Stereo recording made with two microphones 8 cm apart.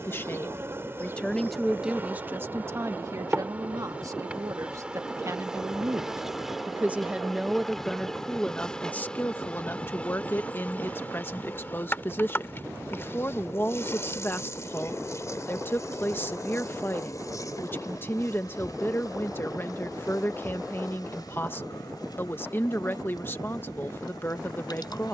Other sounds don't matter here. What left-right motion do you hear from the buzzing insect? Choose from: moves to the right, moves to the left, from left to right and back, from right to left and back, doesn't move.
moves to the left.